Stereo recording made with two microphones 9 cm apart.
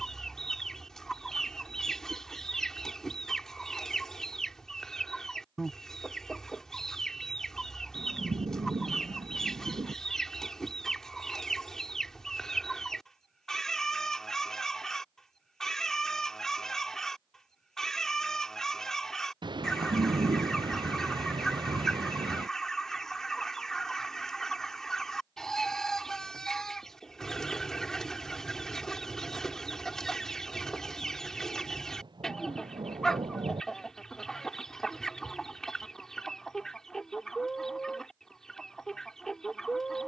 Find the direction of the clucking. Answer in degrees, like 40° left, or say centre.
centre.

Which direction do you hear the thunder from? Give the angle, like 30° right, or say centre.
60° right.